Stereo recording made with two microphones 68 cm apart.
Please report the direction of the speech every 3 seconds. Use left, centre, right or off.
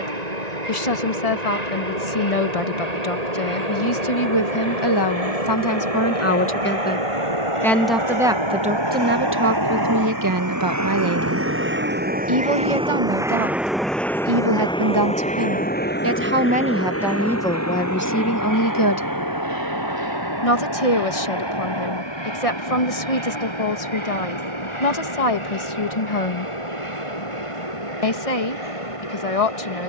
left, left, centre, right, right, centre, left, left, left, left.